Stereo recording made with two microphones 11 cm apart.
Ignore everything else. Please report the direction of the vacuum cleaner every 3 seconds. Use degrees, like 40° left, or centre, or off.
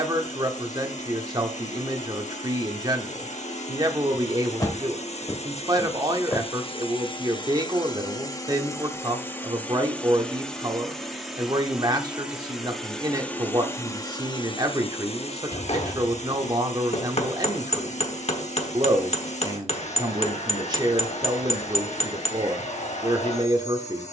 80° left, 70° left, 40° left, 10° left, 20° left, 70° left, 70° left, 70° left.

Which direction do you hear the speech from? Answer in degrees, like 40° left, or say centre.
30° right.